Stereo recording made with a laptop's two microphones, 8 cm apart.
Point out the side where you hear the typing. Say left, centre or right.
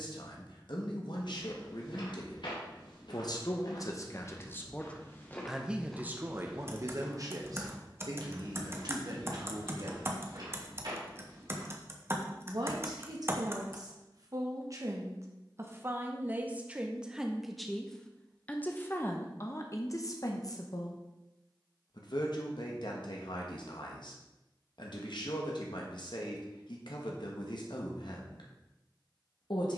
right.